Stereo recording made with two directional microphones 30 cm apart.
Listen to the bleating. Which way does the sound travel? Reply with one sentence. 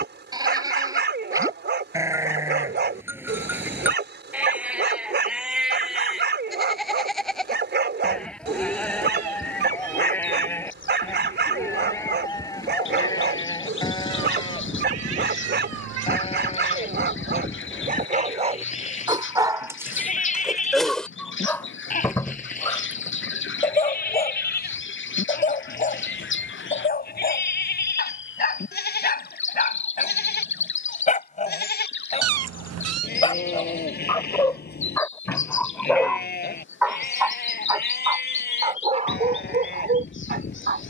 In this clip you hear the bleating travel towards the left.